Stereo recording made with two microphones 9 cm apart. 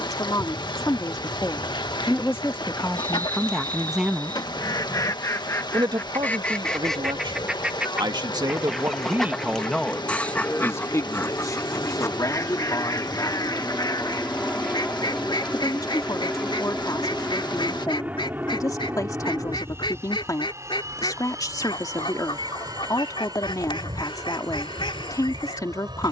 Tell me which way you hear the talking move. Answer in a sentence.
You can hear the talking move from left to right and back again.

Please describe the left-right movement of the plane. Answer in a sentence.
You can hear the plane travel towards the right.